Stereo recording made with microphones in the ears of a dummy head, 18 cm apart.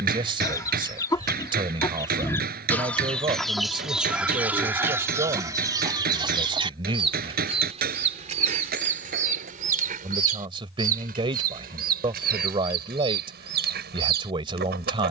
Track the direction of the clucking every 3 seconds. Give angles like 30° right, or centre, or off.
20° left, 10° right, 30° right, 40° right, 50° right.